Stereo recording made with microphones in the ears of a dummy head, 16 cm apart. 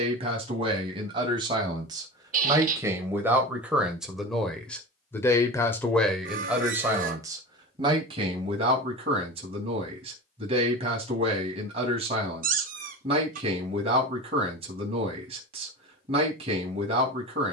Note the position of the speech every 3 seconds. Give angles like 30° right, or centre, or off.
20° right, centre, 20° right, 30° right, 30° right, 30° right.